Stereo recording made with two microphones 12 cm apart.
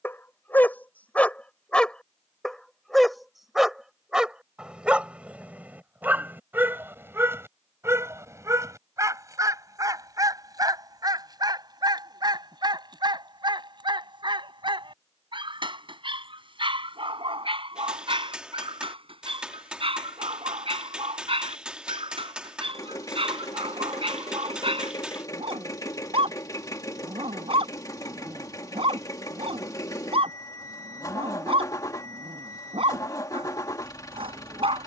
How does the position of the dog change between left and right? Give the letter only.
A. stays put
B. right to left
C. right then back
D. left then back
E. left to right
E.